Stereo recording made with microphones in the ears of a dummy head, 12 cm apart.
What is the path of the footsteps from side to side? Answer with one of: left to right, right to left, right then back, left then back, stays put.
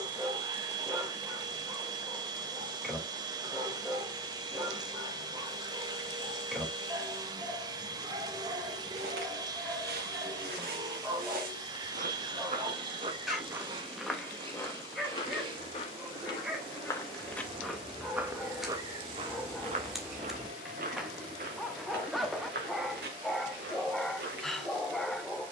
left then back.